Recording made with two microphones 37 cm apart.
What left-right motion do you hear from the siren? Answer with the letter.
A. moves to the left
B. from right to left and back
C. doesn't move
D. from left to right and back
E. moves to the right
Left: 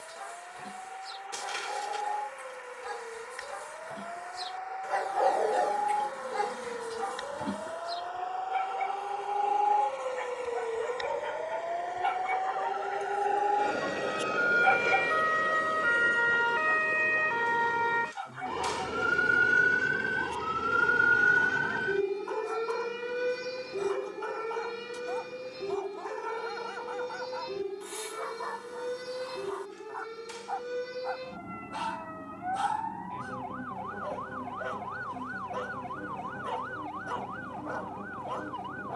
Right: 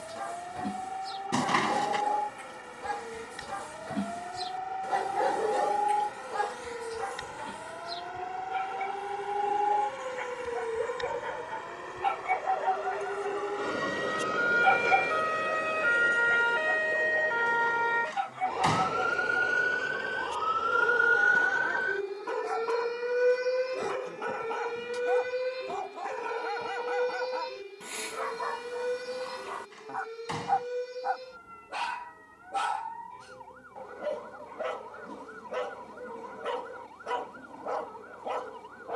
A.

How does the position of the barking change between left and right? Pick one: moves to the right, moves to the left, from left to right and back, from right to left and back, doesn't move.
from right to left and back.